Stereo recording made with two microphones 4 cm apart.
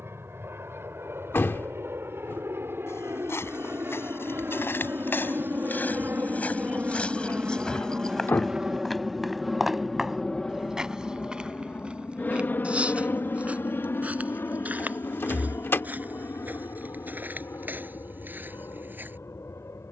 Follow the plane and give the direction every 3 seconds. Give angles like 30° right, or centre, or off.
70° right, 50° right, 30° right, 10° left, 50° left, 60° left, 70° left.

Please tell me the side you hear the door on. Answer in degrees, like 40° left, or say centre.
50° left.